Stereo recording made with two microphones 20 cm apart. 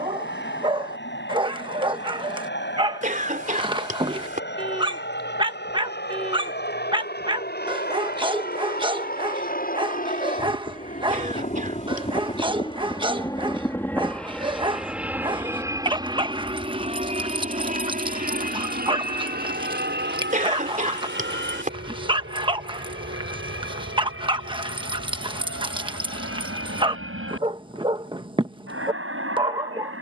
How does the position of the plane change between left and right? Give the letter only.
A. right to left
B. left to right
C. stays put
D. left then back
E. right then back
B.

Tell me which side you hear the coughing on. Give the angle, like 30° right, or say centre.
40° right.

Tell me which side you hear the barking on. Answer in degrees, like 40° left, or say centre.
20° right.